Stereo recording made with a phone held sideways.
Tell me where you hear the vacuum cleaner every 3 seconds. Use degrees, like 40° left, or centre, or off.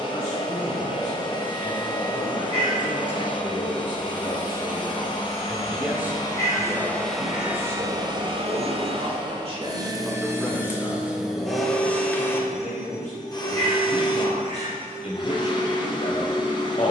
40° left, 40° left, 10° right, 20° right, 30° left, 30° left.